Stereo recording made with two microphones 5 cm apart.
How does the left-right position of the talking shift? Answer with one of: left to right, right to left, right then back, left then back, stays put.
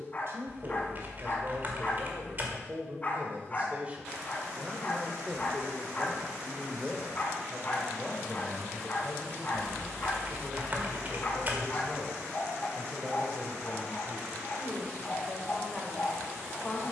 right to left.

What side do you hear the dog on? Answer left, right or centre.
left.